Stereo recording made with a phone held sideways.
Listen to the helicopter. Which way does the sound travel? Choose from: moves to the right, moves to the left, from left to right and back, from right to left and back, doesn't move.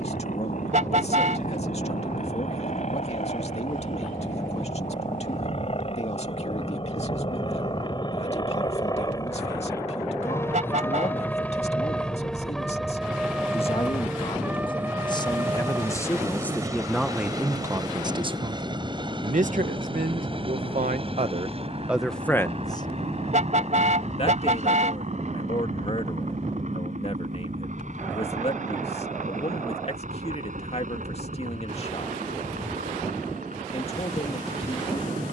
moves to the right.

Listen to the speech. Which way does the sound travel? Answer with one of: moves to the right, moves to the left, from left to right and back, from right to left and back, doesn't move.
from left to right and back.